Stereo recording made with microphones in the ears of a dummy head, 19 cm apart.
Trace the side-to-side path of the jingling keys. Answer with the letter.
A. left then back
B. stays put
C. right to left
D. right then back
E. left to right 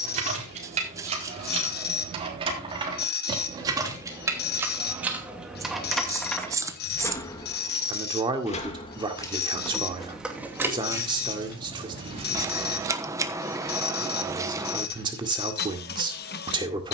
A.